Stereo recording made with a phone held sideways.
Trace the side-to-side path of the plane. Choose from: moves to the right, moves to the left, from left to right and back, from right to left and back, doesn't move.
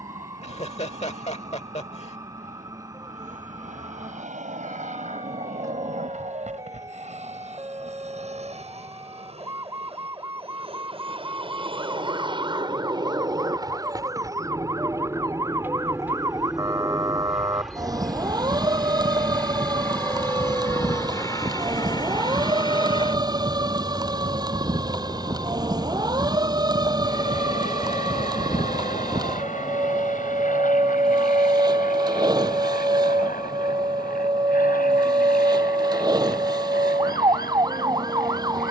moves to the left.